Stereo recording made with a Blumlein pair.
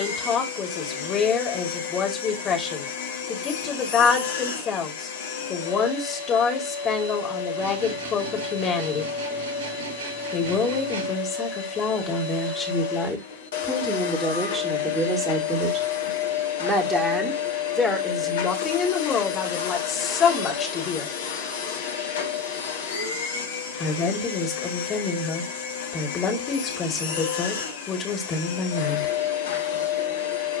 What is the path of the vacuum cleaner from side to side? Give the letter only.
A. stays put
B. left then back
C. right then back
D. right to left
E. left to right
A.